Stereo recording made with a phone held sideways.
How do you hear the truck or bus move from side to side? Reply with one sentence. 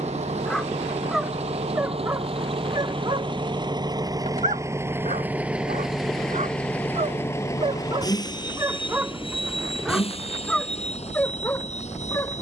You can hear the truck or bus move to the left.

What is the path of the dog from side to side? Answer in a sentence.
You can hear the dog go right and come back.